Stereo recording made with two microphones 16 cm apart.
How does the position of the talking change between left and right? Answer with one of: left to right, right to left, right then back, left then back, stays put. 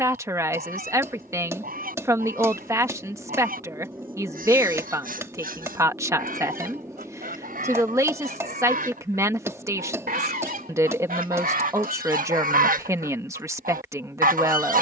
stays put.